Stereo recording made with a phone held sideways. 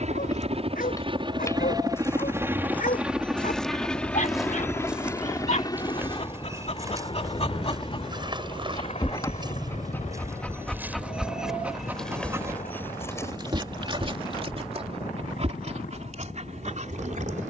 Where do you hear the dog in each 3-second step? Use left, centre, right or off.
left, left, left, centre, right, right.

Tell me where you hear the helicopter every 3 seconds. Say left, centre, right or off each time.
right, centre, left, left, left, left.